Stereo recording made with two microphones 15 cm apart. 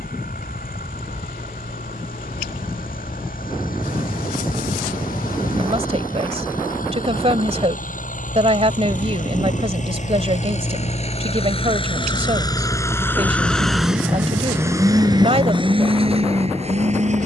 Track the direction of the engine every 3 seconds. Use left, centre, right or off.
left, left, left, left, centre, right.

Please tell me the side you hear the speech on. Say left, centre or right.
right.